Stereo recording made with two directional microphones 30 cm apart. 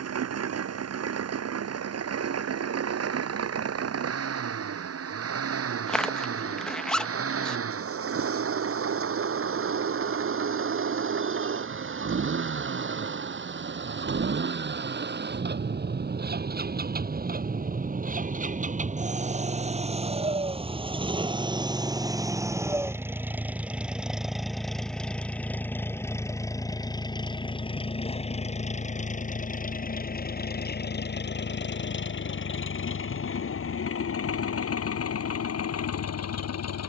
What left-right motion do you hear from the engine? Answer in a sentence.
You can hear the engine move to the left.